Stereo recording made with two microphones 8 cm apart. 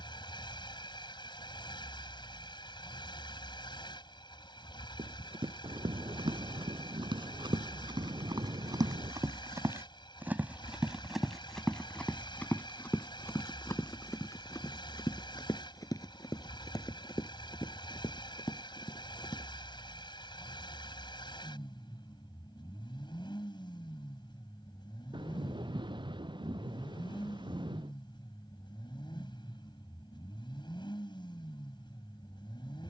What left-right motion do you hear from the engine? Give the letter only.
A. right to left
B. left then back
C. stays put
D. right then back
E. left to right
C.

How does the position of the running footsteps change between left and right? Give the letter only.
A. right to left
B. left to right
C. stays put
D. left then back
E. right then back
A.